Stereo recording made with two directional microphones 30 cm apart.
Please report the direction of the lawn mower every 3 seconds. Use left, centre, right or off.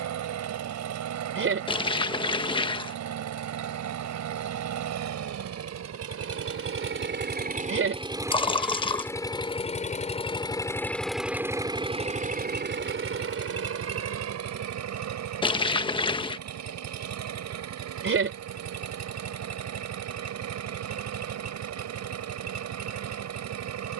right, right, right, centre, right, right, right, right.